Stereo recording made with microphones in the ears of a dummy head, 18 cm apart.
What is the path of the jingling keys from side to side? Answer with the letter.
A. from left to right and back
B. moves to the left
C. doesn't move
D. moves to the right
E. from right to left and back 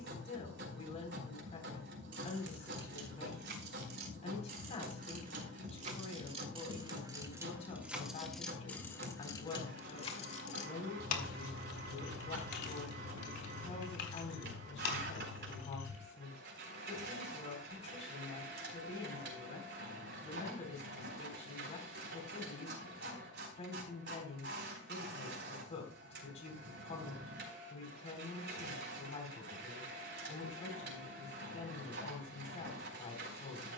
B.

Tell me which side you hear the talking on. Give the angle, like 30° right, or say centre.
30° left.